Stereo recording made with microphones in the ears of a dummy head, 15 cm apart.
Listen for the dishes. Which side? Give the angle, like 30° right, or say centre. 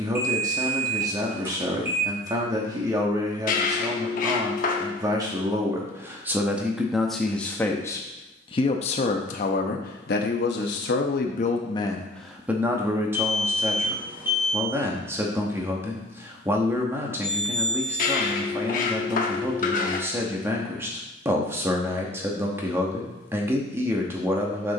50° left.